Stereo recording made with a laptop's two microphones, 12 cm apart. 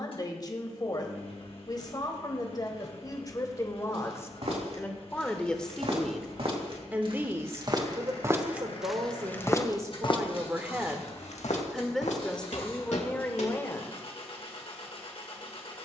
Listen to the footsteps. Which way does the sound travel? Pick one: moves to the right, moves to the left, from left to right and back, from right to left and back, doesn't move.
moves to the left.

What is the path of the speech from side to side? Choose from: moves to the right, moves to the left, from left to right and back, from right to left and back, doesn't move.
from left to right and back.